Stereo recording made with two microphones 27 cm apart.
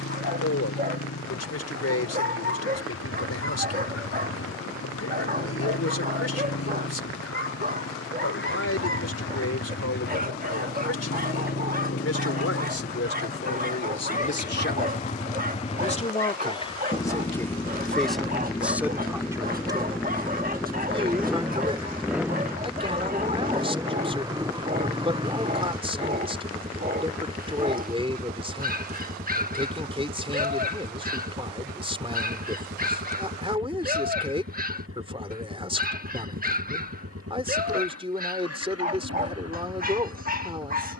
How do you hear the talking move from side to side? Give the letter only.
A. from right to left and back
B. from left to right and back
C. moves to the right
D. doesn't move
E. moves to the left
C.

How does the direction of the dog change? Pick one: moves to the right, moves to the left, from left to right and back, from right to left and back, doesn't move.
doesn't move.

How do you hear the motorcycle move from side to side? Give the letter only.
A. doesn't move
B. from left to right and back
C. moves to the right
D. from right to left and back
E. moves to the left
C.